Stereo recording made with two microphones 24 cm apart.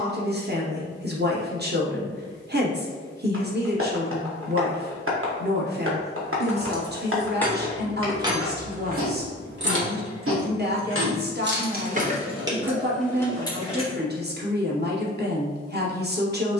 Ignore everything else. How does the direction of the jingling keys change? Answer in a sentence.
You can hear the jingling keys go right and come back.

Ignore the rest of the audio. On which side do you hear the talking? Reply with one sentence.
In this clip you hear the talking on the right.